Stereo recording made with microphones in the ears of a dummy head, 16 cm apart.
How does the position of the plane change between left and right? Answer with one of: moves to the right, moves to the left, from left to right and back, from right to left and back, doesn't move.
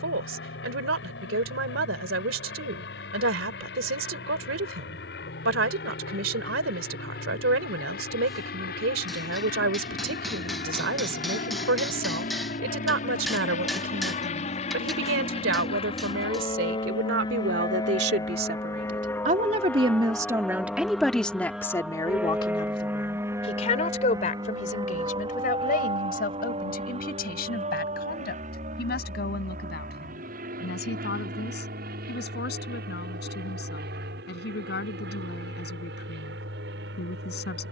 moves to the right.